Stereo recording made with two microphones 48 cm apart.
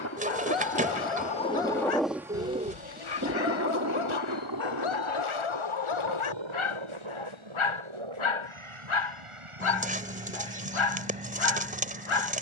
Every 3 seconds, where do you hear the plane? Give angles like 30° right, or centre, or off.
10° left, 40° right, 60° right, 70° right.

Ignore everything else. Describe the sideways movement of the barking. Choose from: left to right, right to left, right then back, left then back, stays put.
stays put.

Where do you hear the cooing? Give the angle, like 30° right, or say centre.
20° right.